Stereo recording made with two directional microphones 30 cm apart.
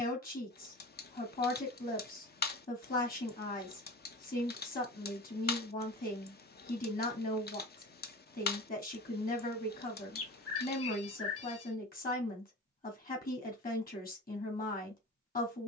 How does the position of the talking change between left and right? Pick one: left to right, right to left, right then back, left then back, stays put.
stays put.